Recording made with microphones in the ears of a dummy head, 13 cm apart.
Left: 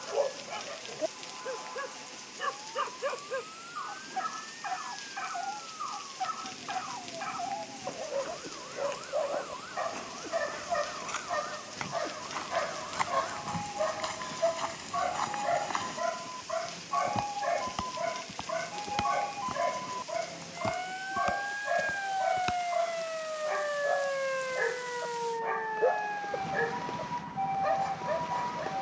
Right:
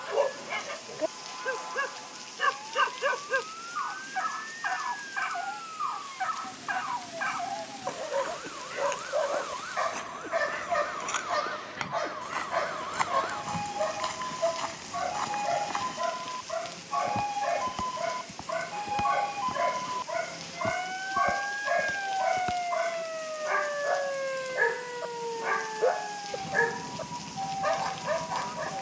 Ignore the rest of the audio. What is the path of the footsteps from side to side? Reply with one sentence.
You can hear the footsteps move to the left.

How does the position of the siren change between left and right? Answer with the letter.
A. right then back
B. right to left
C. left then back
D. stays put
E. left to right
B.